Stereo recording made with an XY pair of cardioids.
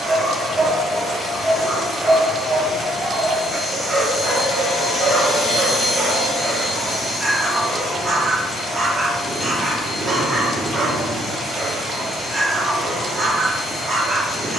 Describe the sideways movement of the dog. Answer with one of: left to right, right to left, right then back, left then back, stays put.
stays put.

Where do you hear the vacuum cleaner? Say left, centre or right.
left.